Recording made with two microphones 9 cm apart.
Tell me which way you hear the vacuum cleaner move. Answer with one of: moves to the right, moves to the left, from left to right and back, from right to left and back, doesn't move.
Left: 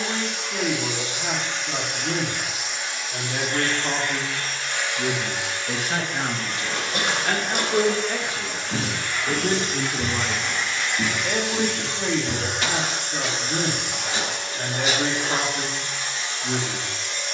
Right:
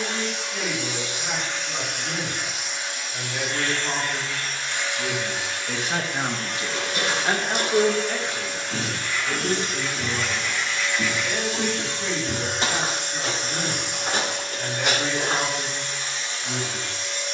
doesn't move.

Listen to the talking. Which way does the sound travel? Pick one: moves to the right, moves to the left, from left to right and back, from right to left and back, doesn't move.
from left to right and back.